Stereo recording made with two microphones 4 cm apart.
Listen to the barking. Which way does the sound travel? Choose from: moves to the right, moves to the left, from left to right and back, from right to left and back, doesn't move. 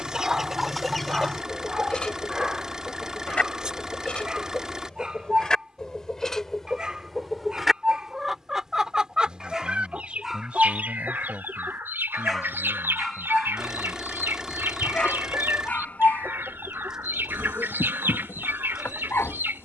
moves to the left.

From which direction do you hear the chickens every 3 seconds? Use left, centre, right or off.
centre, left, centre, right, right, right, right.